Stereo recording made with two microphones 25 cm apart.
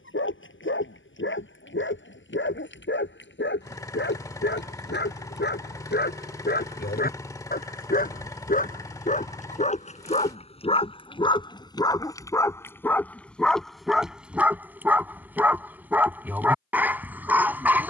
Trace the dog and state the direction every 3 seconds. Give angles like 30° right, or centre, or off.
50° left, 40° left, 40° left, 20° left, centre, 10° right.